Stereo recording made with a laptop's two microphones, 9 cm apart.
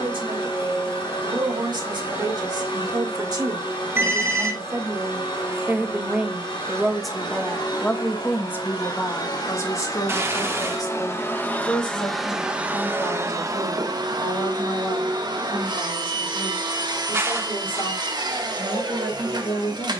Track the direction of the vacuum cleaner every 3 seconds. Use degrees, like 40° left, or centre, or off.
60° left, 60° left, 60° left, 30° left, 30° right, 50° right, 50° right.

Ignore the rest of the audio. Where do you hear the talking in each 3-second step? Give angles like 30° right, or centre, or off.
60° right, 30° right, 10° left, 40° left, 60° left, 70° left, 70° left.